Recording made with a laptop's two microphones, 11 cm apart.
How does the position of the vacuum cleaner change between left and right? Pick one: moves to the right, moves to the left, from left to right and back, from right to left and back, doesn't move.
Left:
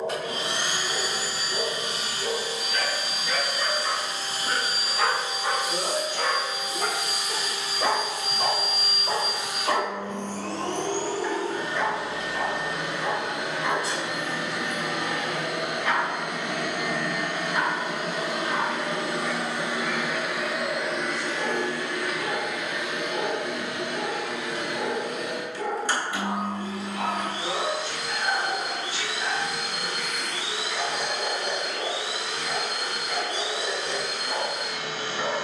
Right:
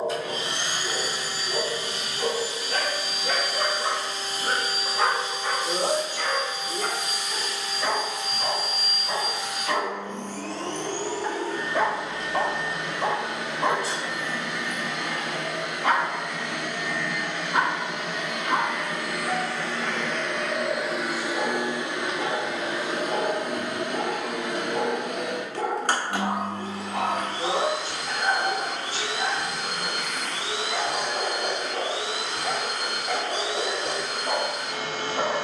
moves to the right.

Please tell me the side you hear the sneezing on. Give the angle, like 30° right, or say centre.
50° right.